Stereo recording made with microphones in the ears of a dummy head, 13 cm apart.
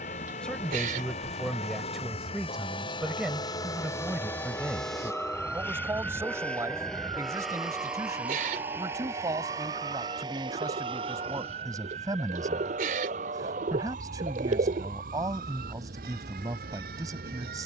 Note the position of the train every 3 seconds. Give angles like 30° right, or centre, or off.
40° left, 20° left, centre, 30° right, 50° right, 70° right.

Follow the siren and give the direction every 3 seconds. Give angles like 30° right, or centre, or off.
50° left, 10° left, 30° right, 50° right, 60° right, 70° right.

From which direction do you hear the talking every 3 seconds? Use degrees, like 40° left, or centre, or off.
centre, 10° right, 20° right, 20° right, 20° right, 20° right.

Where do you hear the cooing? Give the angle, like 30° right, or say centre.
60° right.